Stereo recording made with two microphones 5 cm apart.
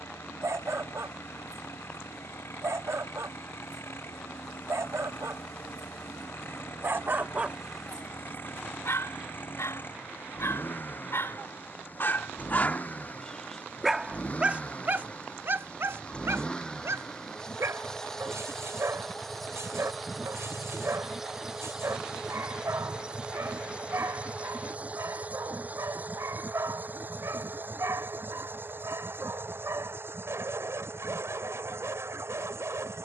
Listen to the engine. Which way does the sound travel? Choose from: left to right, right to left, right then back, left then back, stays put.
left to right.